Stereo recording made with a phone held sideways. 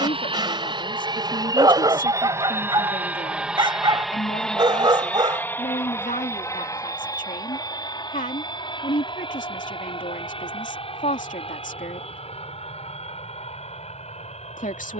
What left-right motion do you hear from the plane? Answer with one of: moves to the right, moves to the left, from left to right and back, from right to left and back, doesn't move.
moves to the left.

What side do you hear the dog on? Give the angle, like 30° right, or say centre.
30° right.